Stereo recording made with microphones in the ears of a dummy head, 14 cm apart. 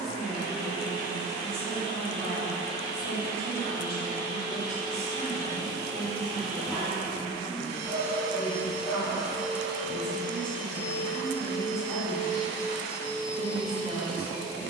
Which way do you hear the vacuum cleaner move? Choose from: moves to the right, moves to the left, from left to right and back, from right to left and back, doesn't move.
moves to the left.